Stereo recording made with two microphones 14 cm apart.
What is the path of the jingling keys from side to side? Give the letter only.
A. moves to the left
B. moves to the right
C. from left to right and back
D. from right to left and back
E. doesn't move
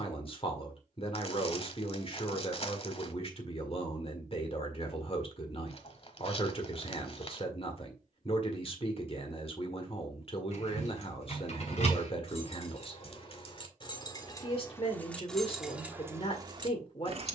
B.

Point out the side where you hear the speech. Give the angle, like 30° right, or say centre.
40° left.